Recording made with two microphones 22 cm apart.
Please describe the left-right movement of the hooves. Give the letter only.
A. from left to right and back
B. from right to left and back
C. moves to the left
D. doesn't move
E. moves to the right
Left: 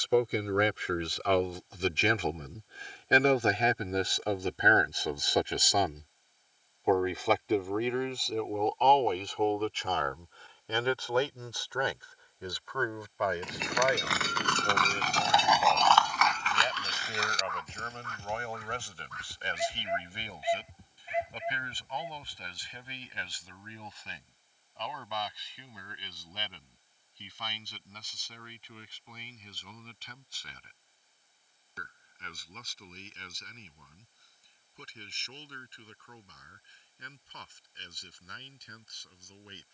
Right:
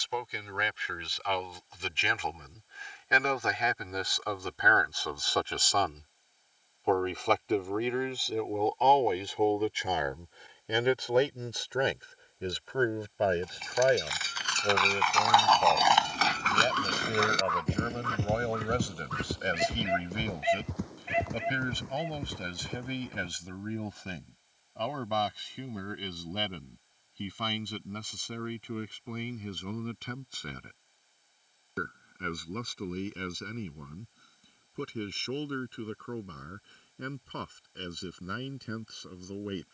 E.